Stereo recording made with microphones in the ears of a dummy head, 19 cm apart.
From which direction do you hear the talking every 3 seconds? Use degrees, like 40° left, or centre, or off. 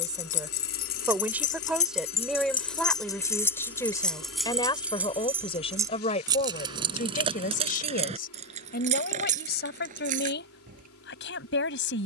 10° right, 20° left, 40° left, 50° left.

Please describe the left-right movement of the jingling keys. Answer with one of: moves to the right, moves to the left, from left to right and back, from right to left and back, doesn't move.
moves to the right.